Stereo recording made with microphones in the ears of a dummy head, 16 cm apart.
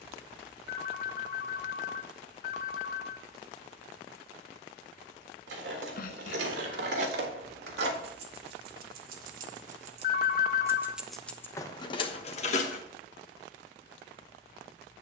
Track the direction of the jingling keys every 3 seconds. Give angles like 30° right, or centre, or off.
off, 80° right, 70° right, 20° right, 40° left.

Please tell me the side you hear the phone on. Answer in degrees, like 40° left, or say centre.
60° left.